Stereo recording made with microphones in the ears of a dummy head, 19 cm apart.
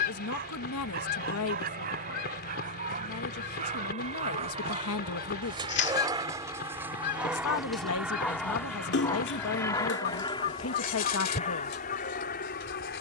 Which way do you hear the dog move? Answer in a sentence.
In this clip you hear the dog move from right to left.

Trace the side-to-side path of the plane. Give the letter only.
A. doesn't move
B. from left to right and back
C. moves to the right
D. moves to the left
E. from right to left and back
D.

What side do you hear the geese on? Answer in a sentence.
In this clip you hear the geese on the left.